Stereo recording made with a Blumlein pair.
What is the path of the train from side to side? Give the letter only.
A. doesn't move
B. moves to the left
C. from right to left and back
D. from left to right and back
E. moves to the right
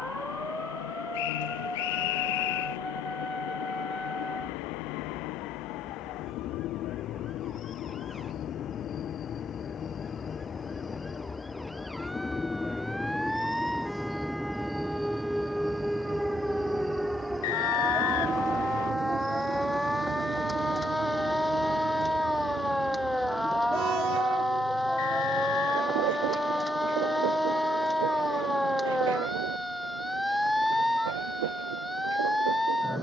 E.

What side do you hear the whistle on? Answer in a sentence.
In this clip you hear the whistle on the left.